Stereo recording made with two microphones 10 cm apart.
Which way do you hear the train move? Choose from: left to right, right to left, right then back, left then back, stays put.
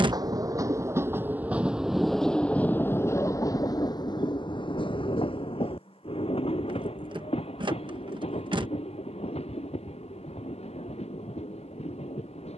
right to left.